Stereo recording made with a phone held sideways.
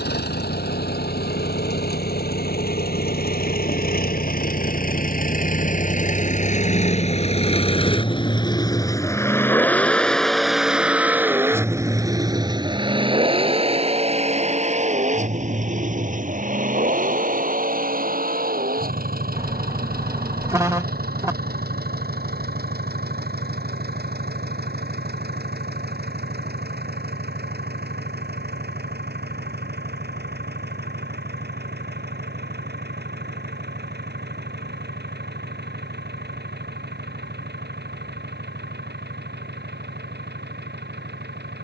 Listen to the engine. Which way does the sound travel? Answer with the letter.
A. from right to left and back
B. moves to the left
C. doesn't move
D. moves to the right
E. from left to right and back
D.